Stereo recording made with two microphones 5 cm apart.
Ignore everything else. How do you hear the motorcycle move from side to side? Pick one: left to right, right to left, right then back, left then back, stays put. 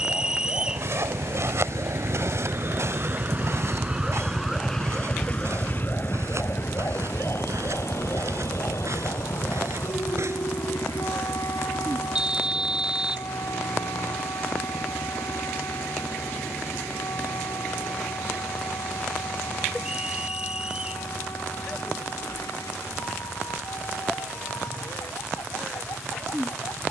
right to left.